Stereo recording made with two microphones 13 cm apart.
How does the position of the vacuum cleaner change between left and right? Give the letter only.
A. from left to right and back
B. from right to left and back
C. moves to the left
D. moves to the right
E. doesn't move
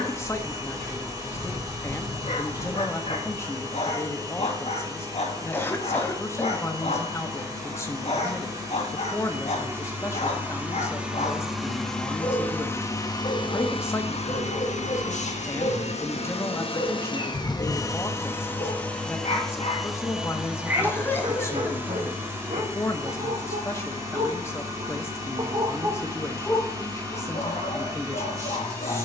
B.